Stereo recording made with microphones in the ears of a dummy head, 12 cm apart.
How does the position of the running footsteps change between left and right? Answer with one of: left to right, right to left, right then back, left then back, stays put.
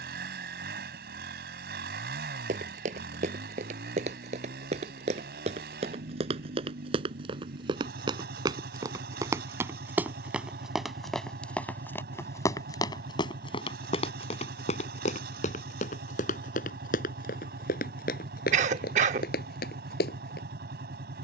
right to left.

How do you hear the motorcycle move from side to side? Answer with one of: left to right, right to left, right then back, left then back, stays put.
stays put.